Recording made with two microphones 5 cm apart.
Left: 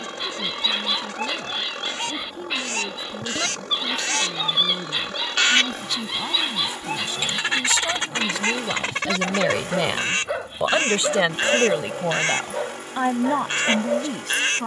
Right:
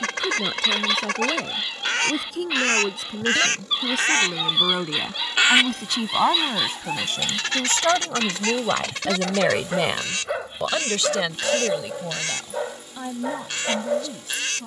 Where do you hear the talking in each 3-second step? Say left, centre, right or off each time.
right, right, right, centre, left.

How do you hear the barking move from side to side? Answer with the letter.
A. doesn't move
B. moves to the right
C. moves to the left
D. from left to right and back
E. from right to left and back
A.